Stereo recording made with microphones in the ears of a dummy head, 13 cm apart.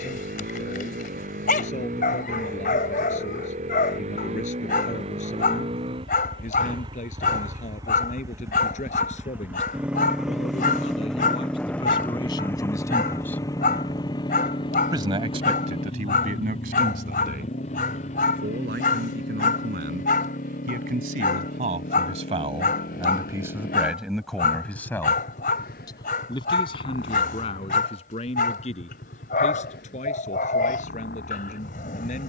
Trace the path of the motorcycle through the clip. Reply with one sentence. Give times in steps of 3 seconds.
You can hear the motorcycle on the right from 0 s, in the centre from 9 s and on the left from 12 s.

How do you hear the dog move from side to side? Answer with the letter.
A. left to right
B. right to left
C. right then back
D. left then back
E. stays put
E.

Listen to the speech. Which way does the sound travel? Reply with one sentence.
You can hear the speech move from left to right and back again.